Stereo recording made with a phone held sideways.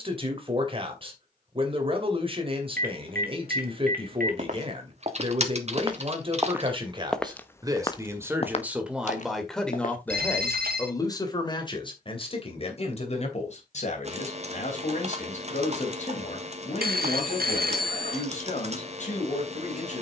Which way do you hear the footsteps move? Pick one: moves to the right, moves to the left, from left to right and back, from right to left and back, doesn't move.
moves to the left.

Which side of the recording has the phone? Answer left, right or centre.
right.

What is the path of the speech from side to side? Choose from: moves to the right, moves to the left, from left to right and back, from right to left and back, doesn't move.
moves to the left.